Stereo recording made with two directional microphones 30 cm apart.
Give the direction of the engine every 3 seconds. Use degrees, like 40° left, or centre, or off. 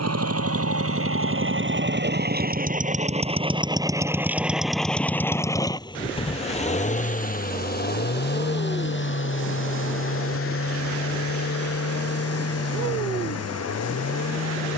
40° right, centre, 30° left, 40° left, 50° left.